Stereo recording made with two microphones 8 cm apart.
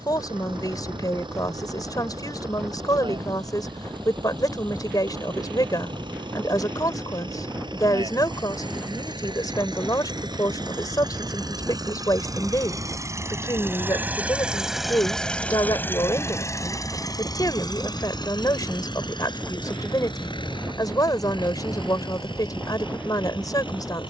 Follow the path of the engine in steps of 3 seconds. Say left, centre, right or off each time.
right, right, right, right, right, left, left, left.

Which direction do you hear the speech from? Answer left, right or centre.
left.